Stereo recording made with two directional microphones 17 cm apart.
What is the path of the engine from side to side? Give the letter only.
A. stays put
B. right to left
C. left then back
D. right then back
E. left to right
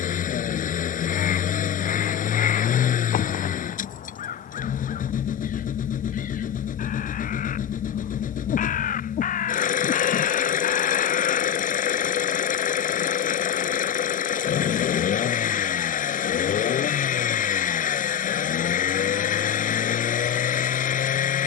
A.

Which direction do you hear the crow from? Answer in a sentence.
You can hear the crow on the left.